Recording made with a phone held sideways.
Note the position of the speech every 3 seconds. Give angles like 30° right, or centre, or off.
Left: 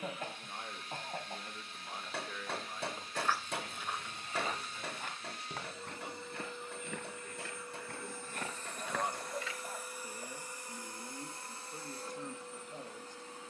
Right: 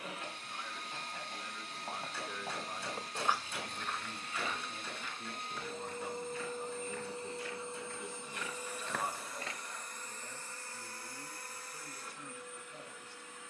20° left, 50° right, 20° right, 40° left, 40° left.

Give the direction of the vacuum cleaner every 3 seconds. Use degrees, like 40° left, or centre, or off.
70° right, 60° right, 30° right, 10° left, 30° left.